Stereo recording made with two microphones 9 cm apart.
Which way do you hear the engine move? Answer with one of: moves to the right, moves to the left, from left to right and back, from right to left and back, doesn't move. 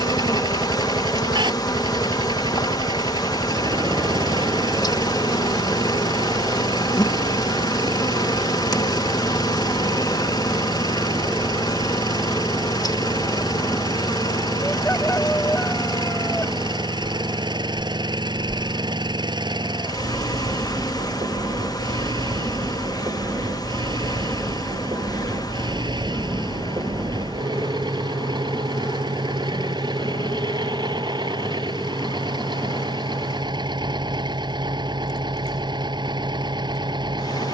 doesn't move.